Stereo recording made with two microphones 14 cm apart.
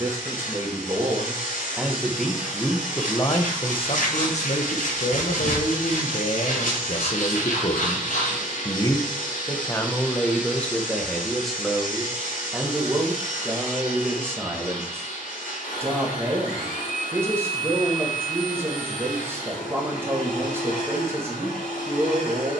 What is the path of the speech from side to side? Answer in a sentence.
In this clip you hear the speech go left and come back.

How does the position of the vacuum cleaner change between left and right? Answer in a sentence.
You can hear the vacuum cleaner stay put.